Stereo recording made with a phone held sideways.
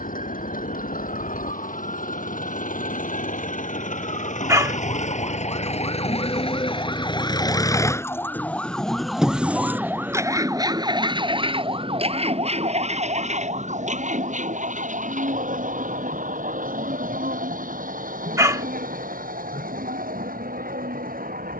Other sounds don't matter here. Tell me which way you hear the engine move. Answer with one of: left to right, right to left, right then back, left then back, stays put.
left to right.